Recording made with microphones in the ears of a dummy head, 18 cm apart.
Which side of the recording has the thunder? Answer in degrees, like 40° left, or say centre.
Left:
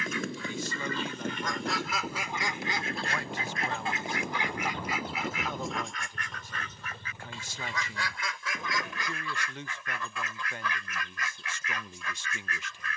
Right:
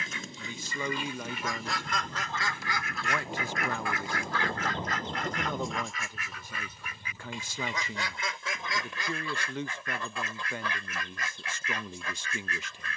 20° right.